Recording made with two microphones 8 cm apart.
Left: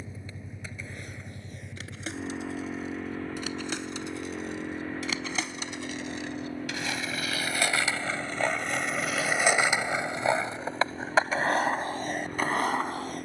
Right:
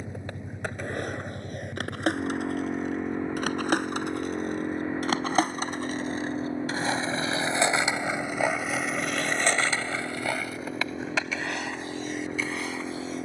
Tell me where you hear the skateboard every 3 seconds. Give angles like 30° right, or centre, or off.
70° right, 60° right, 20° right, 30° left, 50° left.